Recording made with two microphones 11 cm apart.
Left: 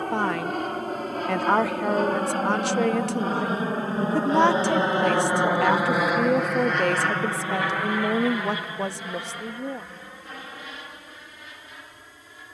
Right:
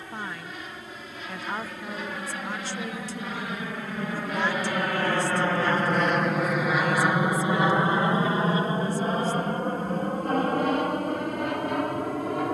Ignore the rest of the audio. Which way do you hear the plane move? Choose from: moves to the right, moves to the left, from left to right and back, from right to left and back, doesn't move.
moves to the right.